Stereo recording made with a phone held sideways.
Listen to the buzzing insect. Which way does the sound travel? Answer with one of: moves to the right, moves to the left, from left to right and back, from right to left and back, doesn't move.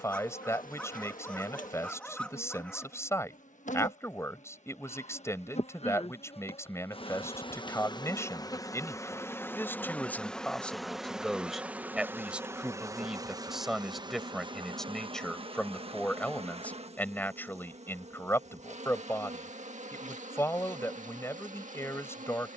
moves to the right.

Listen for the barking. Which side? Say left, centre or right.
centre.